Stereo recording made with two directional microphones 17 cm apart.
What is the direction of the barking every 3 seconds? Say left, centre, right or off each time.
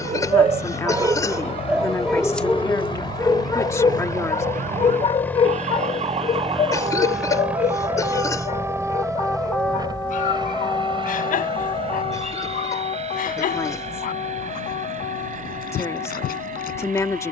centre, left, left, left, left, left.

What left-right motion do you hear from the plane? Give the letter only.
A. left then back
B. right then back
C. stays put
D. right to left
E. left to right
E.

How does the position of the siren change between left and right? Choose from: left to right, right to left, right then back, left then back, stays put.
right to left.